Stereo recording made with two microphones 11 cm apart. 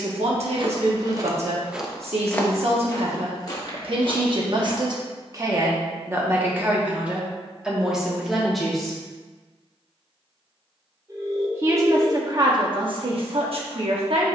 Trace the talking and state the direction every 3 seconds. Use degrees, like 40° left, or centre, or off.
70° right, 50° right, 10° right, 20° right, 60° right.